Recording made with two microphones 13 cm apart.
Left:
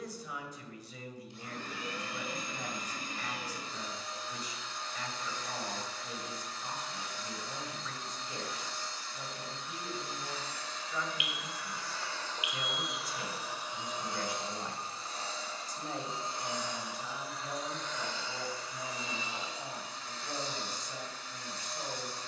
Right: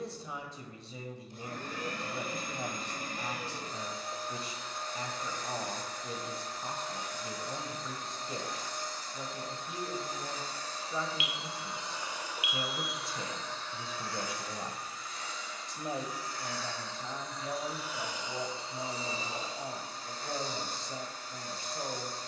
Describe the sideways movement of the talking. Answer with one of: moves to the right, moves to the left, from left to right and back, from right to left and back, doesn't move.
doesn't move.